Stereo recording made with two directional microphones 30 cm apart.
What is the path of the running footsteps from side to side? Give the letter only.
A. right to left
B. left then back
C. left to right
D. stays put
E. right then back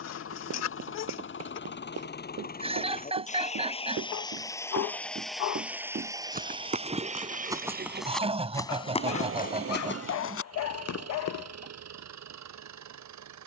A.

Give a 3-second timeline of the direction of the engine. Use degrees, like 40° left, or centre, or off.
40° left, 10° left, 30° right, 50° right, 60° right.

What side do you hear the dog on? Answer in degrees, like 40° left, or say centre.
60° left.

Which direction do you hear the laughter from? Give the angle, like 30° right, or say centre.
20° right.